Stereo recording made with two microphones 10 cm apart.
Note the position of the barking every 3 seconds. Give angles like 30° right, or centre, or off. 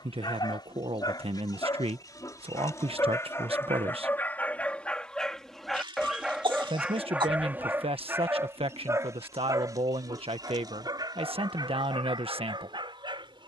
40° left, 10° left, 20° right, 40° right, 50° right.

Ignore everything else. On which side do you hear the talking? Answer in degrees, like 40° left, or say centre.
80° right.